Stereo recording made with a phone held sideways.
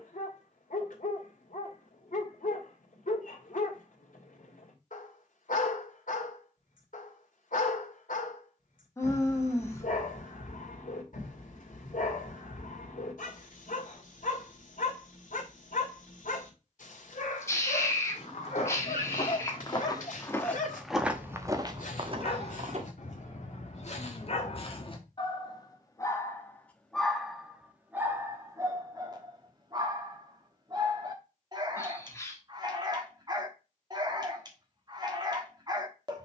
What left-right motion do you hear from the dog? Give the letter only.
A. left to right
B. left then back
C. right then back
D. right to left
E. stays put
A.